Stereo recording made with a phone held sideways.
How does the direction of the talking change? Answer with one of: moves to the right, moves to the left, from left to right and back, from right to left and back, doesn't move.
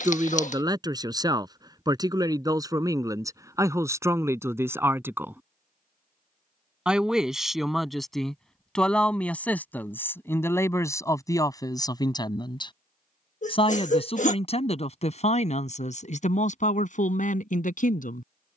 moves to the left.